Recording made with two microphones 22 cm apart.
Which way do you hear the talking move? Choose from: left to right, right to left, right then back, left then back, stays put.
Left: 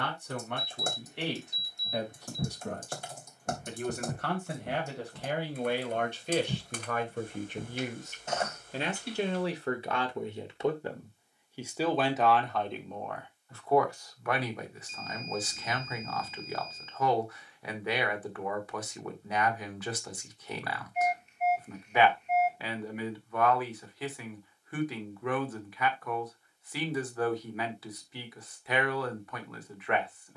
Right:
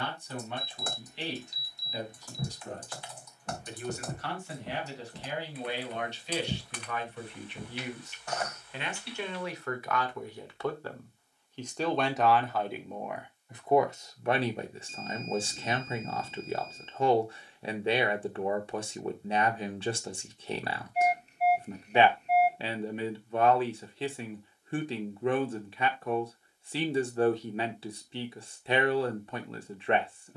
left to right.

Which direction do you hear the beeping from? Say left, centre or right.
right.